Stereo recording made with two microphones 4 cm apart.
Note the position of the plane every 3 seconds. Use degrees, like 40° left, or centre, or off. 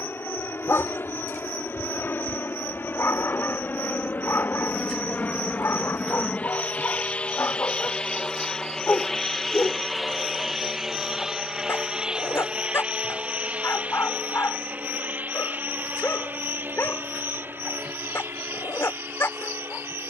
60° left, 50° left, 20° left, 10° right, 30° right, 40° right, 50° right.